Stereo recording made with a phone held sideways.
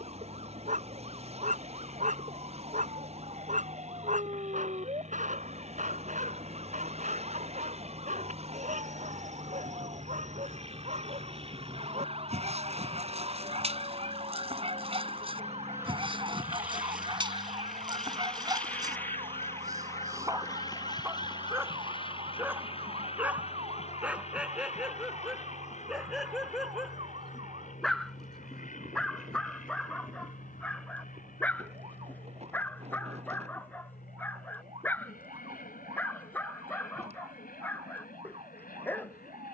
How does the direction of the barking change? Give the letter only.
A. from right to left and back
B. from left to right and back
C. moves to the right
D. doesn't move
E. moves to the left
E.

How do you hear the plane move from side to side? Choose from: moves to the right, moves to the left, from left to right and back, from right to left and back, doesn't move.
moves to the left.